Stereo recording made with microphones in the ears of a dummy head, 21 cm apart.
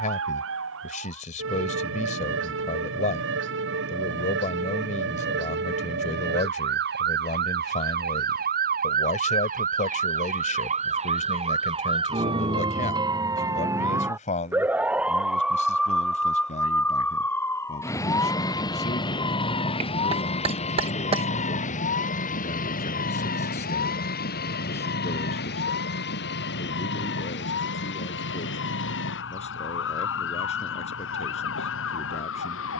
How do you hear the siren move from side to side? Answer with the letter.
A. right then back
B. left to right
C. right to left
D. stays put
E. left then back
C.